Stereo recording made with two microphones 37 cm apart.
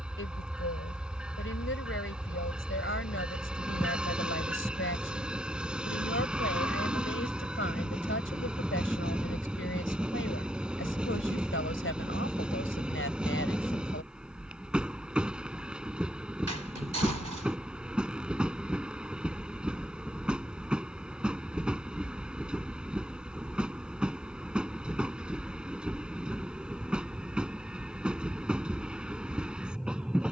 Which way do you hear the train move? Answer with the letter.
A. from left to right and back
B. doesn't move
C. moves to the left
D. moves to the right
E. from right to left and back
B.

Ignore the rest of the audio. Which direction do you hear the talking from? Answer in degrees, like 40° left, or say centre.
30° left.